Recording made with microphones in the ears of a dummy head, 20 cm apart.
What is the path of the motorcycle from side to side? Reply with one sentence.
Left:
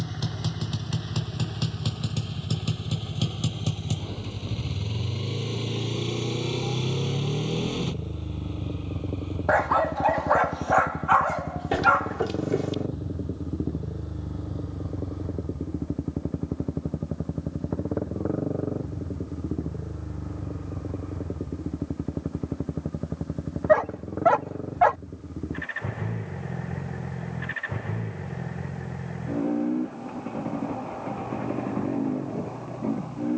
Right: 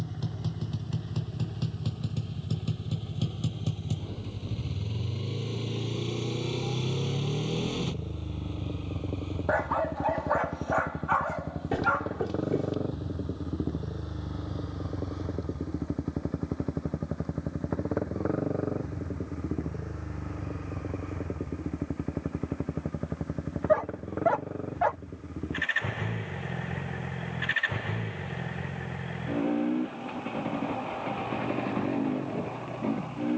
You can hear the motorcycle travel towards the right.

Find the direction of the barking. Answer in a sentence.
In this clip you hear the barking on the left.